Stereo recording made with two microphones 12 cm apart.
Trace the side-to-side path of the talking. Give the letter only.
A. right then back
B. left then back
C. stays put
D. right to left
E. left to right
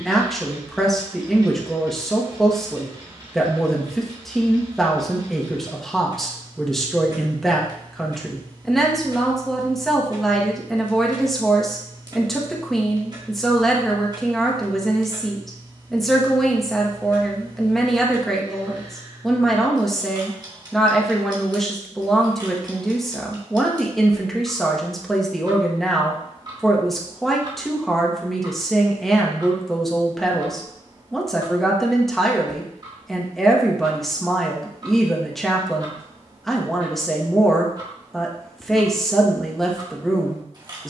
C.